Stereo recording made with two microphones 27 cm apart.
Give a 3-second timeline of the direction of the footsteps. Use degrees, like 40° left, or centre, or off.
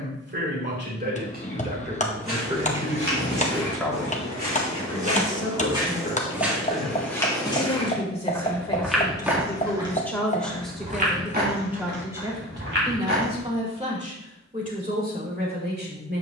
50° right, 30° right, centre, 20° right, 50° right, off.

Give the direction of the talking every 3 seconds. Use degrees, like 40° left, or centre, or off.
30° right, 20° left, 30° left, centre, 20° right, 40° right.